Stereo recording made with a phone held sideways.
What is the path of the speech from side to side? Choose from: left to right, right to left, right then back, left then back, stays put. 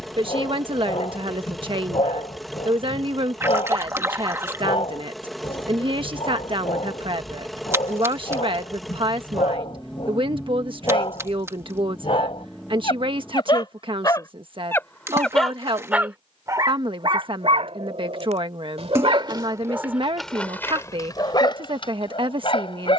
stays put.